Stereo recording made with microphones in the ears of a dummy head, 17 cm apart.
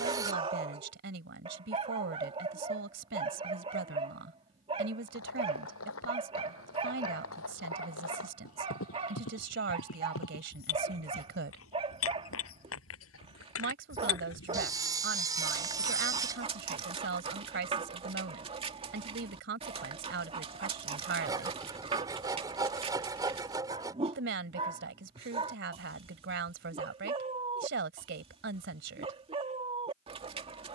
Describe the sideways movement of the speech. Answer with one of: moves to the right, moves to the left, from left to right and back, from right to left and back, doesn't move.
doesn't move.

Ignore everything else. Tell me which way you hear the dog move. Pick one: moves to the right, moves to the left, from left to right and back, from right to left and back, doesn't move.
doesn't move.